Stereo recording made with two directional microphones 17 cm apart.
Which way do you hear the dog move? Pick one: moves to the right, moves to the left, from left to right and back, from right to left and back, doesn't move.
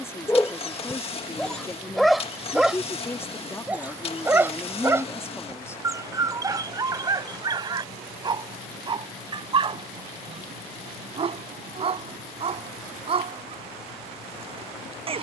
moves to the right.